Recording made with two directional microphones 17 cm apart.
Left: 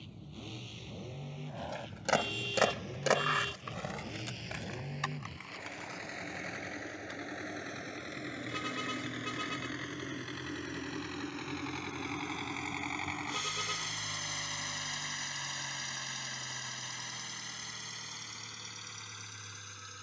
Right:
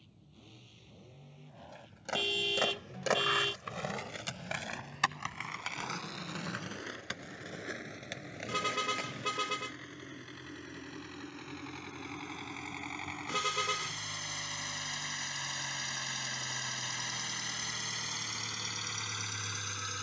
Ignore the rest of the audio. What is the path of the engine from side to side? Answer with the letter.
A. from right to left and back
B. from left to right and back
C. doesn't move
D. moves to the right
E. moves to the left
D.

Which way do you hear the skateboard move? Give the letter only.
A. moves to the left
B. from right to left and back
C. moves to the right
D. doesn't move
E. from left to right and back
C.